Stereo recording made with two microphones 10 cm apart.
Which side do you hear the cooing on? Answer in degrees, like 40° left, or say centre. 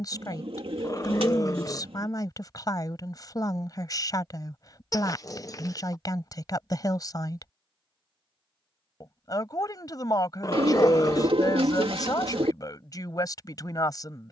70° right.